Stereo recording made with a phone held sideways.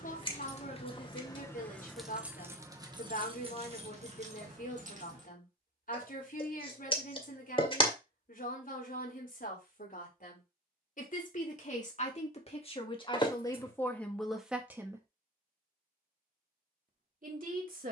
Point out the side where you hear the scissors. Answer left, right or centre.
left.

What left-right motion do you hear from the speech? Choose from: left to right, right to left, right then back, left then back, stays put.
left to right.